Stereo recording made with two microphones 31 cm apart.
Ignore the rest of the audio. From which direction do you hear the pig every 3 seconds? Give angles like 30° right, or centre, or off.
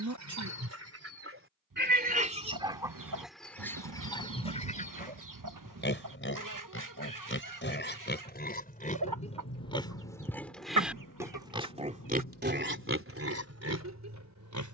40° right, 20° left, 30° left, centre, 40° right.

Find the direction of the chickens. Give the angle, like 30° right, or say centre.
70° right.